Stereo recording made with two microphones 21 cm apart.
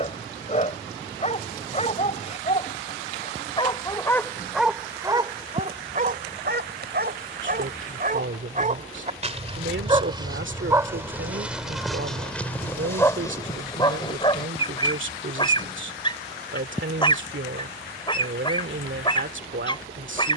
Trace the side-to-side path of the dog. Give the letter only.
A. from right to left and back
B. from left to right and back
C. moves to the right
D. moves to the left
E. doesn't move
B.